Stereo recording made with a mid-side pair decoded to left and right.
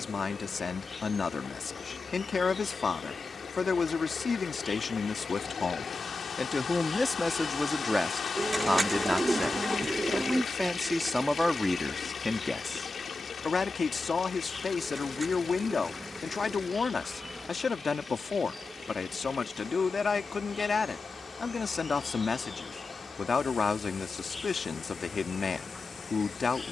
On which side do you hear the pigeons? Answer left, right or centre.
right.